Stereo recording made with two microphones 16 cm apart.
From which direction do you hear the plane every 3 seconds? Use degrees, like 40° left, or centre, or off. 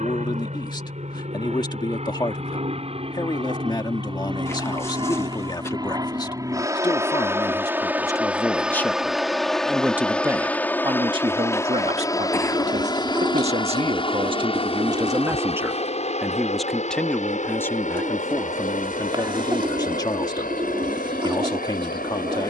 50° right, 30° right, 10° right, 10° left, 30° left, 40° left, 50° left, 60° left.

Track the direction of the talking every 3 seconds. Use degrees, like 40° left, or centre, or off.
30° left, 30° left, 20° left, 20° right, 40° right, centre, 20° left, 30° left.